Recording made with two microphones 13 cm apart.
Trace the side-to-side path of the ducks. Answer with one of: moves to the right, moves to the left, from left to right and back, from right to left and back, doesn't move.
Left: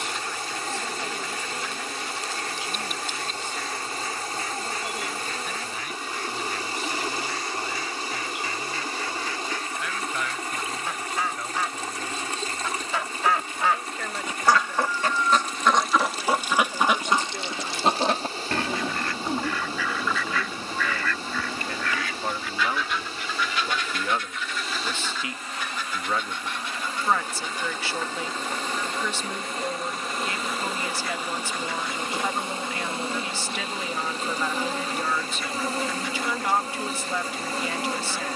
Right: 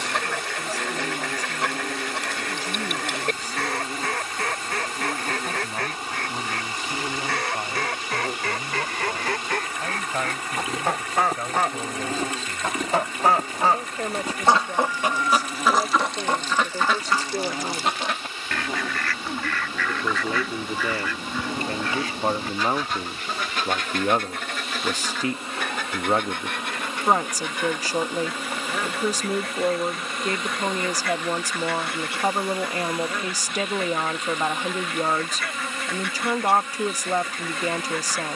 from right to left and back.